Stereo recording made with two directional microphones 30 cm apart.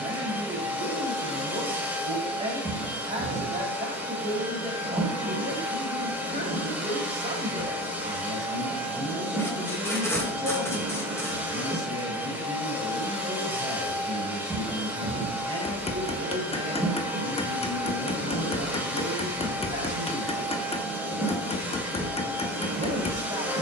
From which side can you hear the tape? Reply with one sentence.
You can hear the tape in the centre.